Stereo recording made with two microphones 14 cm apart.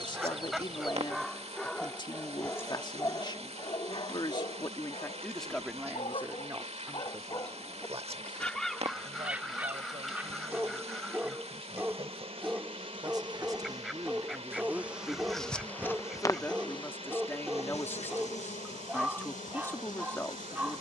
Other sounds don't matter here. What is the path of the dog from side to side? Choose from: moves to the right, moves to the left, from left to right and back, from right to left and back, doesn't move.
from right to left and back.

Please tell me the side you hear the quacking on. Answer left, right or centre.
centre.